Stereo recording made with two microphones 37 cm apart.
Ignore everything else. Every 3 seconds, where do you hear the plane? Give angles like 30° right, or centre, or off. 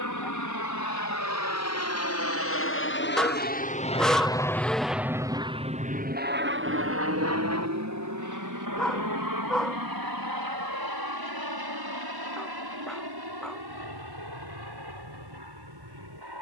50° left, 10° left, 40° right, 60° right, 70° right, 70° right.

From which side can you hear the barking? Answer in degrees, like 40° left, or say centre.
centre.